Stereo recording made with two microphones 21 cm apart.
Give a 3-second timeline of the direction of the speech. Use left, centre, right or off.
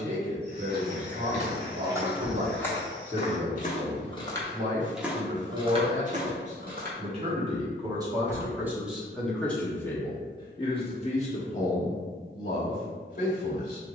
right, right, right, left, left.